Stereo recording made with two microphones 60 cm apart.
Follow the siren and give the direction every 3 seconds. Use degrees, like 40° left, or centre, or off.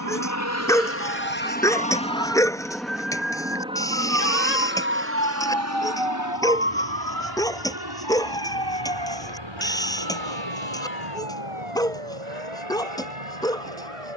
60° left, 30° left, 20° right, 50° right, 60° right.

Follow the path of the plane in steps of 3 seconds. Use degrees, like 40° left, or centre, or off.
20° left, 10° right, 30° right, 40° right, 50° right.